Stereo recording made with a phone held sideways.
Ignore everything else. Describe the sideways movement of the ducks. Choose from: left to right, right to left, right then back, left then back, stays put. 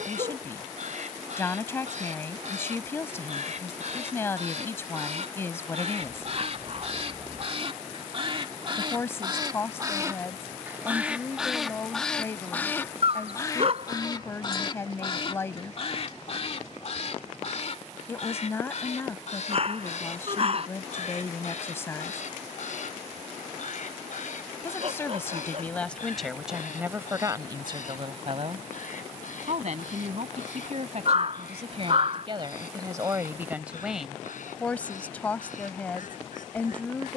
right to left.